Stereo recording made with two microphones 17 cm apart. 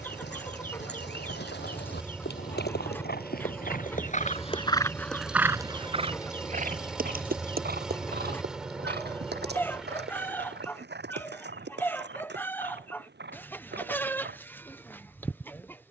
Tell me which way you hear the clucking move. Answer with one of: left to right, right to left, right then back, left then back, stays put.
stays put.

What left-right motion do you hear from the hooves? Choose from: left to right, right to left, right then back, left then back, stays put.
left to right.